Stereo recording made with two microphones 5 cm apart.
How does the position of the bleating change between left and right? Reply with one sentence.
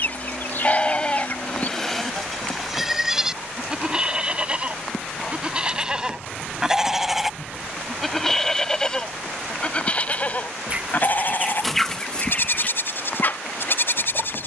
You can hear the bleating move from left to right and back again.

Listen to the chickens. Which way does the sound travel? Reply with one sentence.
You can hear the chickens move from left to right and back again.